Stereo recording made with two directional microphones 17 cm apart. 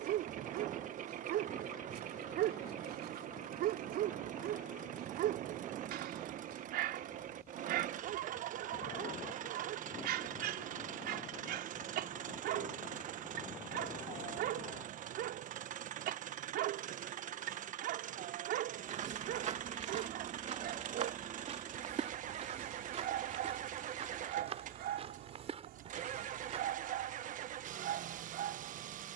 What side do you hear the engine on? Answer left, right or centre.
right.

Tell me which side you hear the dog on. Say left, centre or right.
right.